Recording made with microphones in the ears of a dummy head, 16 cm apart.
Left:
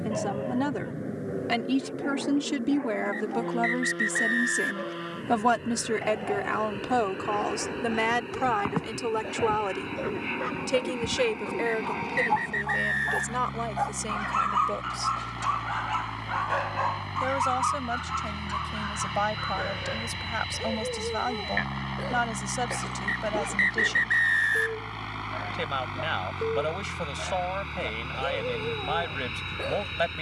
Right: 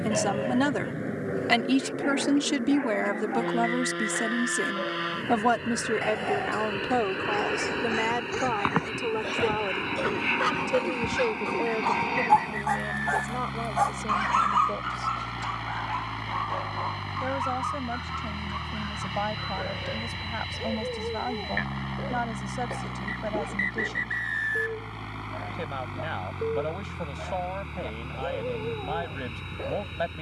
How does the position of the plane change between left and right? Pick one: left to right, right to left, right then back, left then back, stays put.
right to left.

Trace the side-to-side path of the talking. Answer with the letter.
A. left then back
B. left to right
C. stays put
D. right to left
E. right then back
D.